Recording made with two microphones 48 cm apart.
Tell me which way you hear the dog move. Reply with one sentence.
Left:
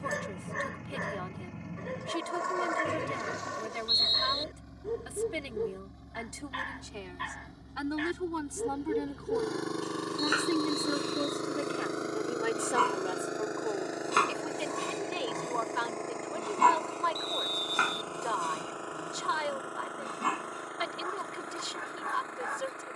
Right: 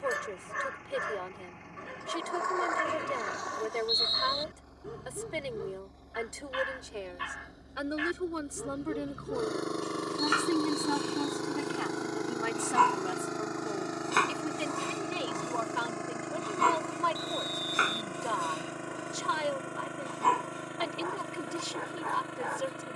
You can hear the dog move to the left.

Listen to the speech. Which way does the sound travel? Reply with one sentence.
In this clip you hear the speech move to the right.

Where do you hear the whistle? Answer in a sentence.
In this clip you hear the whistle on the left.